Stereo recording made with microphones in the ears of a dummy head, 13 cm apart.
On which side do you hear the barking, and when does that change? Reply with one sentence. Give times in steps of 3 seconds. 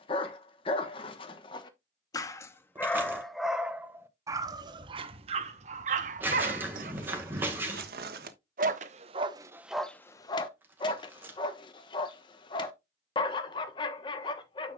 You can hear the barking on the left from 0 s, on the right from 3 s, in the centre from 9 s and on the left from 12 s.